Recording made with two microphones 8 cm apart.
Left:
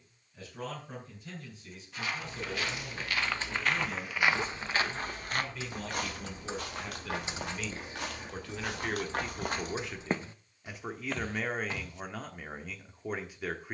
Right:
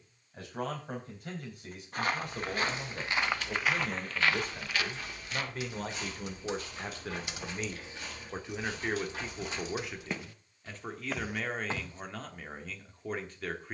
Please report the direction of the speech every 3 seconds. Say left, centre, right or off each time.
right, right, right, centre, centre.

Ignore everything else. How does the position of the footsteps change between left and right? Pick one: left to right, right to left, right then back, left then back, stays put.
left then back.